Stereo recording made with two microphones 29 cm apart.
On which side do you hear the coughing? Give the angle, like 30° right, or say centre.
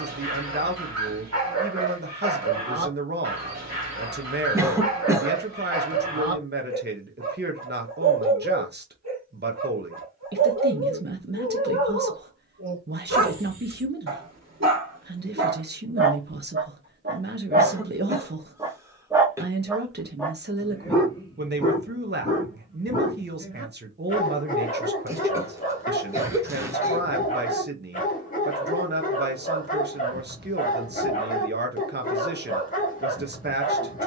10° right.